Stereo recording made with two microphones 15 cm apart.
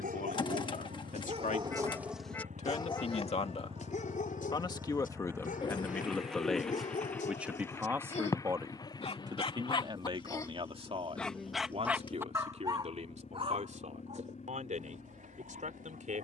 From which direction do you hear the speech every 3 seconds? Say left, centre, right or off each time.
left, left, centre, right, right, right.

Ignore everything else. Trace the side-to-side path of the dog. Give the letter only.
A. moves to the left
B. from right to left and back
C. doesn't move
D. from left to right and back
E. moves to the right
B.